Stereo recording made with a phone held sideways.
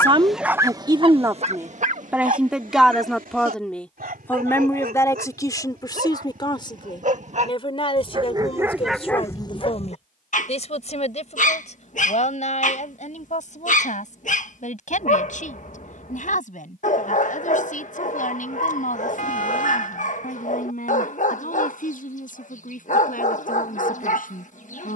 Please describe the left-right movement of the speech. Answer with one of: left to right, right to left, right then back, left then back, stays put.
right to left.